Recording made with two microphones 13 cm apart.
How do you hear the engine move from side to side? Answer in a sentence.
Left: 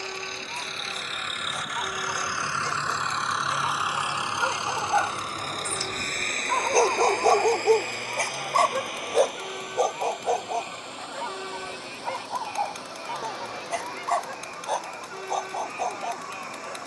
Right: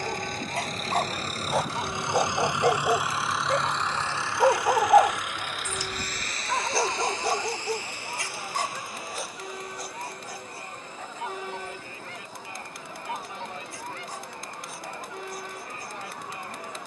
In this clip you hear the engine travel towards the left.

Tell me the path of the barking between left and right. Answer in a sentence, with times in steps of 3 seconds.
You can hear the barking on the right from 0 s and on the left from 6 s.